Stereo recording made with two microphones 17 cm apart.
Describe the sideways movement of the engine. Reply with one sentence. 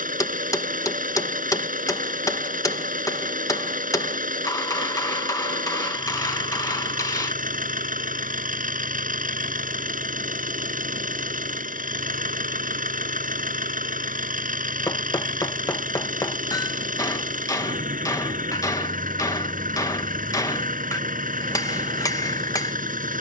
In this clip you hear the engine stay put.